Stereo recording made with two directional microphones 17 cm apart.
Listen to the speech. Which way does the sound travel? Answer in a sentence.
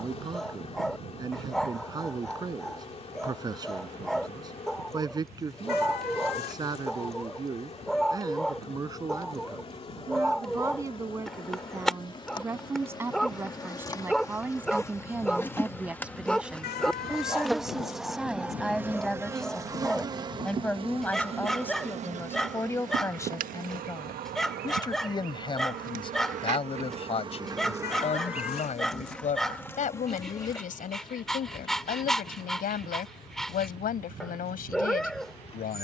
You can hear the speech go from the right side to the left.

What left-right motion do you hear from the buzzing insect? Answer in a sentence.
You can hear the buzzing insect move from left to right and back again.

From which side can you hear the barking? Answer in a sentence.
You can hear the barking in the centre.